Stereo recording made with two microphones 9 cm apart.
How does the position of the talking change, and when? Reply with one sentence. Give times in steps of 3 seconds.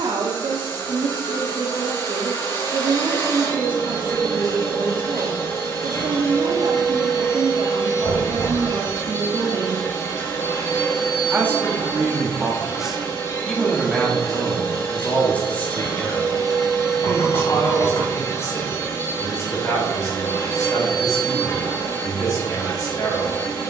You can hear the talking on the right from 0 s, in the centre from 12 s and on the left from 15 s.